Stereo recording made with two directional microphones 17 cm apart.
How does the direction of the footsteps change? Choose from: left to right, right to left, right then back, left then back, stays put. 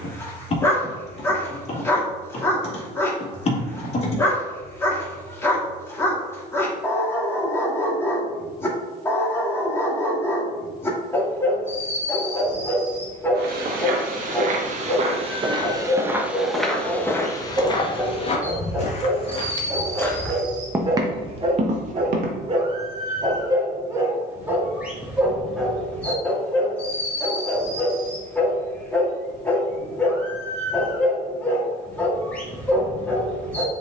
left then back.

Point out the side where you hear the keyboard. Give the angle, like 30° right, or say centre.
40° left.